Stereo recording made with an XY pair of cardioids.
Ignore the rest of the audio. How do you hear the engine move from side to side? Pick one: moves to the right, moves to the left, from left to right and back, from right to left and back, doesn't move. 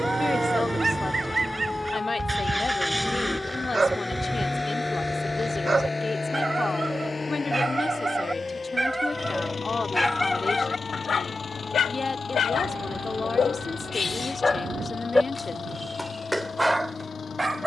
moves to the left.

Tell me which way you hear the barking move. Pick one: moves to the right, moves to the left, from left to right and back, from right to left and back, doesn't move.
from right to left and back.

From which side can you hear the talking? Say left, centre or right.
left.